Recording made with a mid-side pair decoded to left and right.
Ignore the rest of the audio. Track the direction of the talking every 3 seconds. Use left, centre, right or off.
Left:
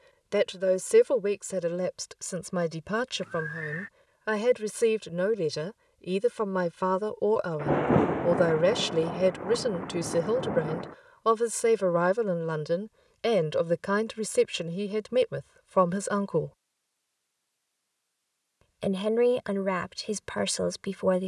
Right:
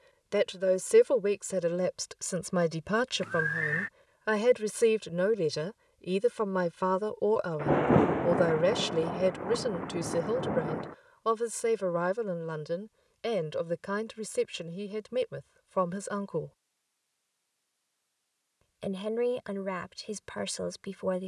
centre, centre, centre, left, left, left, left.